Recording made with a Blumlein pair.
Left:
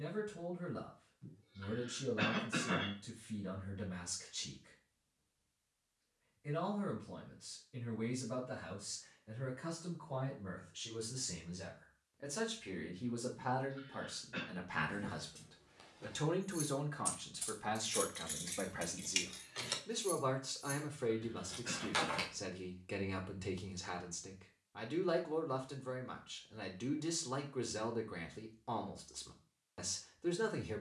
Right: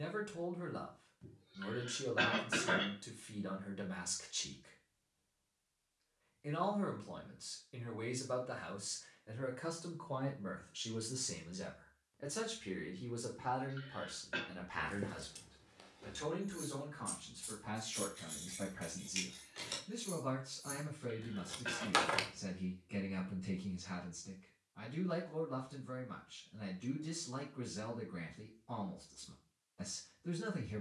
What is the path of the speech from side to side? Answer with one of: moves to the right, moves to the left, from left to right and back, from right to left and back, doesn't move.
moves to the left.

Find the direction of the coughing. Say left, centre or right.
right.